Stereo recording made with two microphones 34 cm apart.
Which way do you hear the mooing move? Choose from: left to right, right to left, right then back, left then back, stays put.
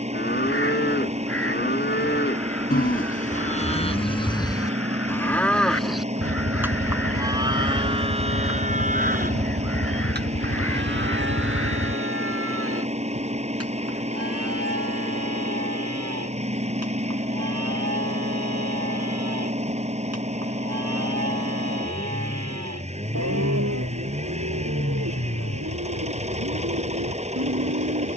left to right.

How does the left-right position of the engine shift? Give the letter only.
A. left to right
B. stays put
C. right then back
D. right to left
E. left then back
B.